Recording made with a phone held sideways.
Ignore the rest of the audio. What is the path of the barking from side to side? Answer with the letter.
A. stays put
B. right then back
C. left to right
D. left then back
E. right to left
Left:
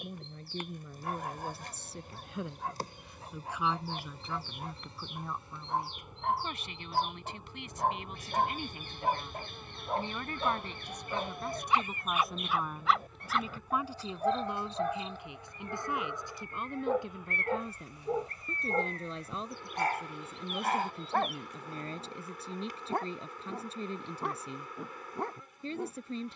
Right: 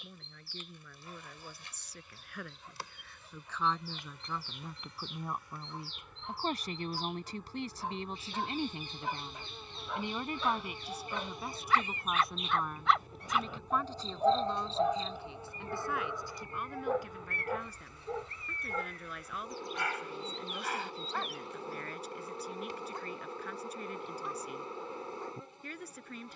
B.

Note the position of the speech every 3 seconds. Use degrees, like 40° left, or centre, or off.
30° left, centre, 30° right, 10° right, 10° left, 20° left, 30° left, 30° left, 30° left.